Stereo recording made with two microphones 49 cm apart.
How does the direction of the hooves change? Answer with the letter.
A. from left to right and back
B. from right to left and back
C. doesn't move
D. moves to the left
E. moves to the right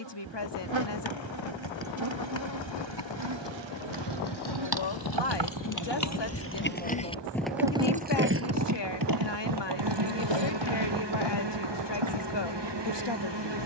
E.